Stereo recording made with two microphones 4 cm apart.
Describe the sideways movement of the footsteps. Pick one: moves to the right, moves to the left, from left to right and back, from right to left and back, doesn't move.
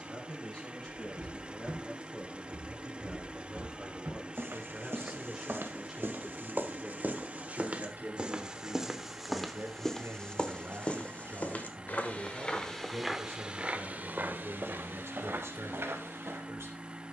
from right to left and back.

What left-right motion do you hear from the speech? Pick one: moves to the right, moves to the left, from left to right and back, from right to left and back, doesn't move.
moves to the right.